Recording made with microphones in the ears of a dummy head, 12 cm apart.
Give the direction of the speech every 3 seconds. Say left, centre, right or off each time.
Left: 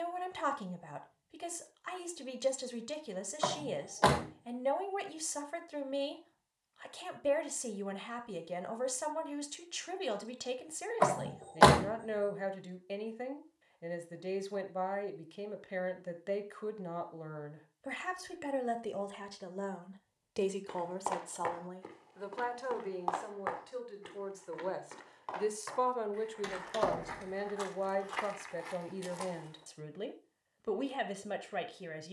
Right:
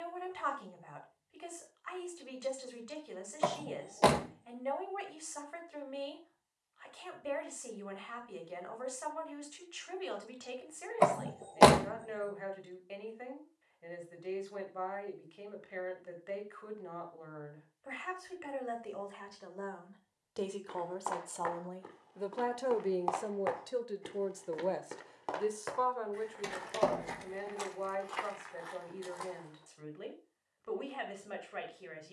left, left, left, left, left, left, left, right, centre, left, left.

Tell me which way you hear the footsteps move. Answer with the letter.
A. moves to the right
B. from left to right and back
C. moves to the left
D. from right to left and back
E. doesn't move
B.